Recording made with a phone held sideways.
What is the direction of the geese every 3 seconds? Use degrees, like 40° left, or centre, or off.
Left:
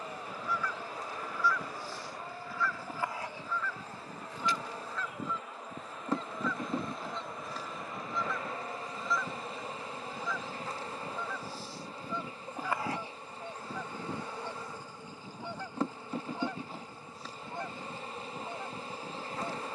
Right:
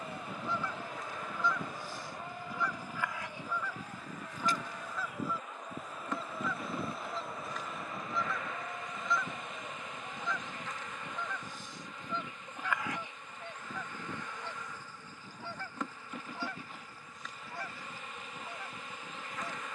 20° right, 10° right, centre, 10° left, 10° left, 20° left, 20° left.